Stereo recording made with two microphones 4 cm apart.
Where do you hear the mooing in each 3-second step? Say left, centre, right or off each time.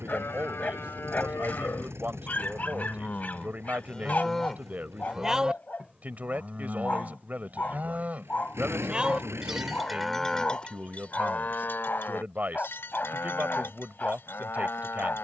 left, centre, right, left, left.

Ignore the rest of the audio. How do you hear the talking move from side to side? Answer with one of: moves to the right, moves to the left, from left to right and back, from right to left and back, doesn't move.
doesn't move.